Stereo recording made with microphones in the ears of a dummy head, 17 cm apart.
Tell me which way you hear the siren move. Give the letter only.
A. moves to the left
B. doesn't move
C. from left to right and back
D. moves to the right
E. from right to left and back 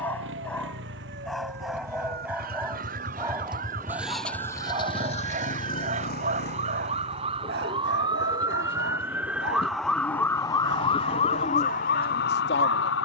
A.